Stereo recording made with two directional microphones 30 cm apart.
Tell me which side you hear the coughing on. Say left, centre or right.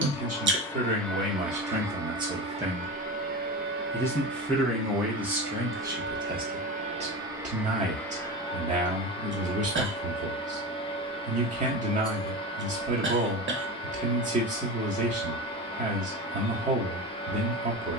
right.